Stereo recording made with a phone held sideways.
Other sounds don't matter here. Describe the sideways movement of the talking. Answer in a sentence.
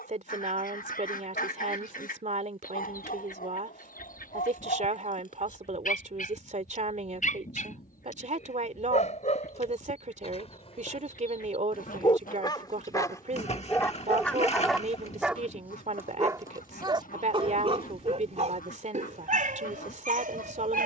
In this clip you hear the talking stay put.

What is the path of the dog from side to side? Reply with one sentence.
You can hear the dog go from the left side to the right.